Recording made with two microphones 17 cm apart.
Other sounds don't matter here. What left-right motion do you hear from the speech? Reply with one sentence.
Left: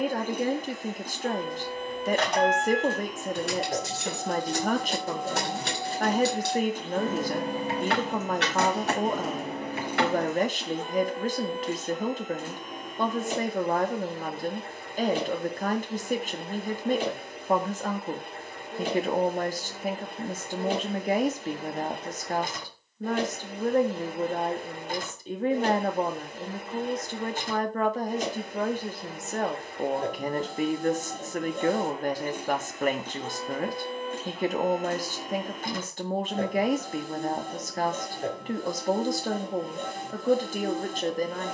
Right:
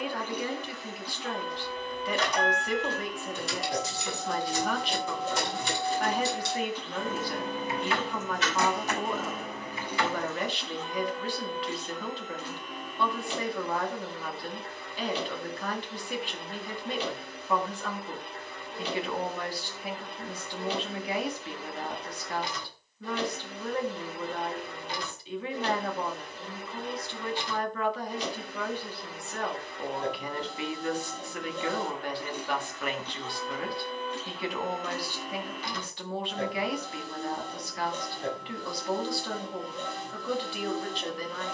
You can hear the speech stay put.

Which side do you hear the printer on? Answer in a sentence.
In this clip you hear the printer on the left.